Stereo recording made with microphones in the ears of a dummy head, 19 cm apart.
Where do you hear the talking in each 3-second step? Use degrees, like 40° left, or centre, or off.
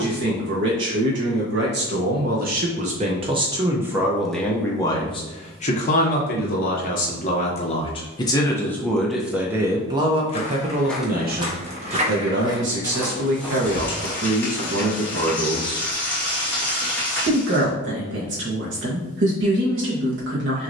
50° right, centre, 30° left, 30° right, 60° right, 60° right, 60° right.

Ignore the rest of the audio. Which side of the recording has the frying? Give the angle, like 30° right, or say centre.
10° left.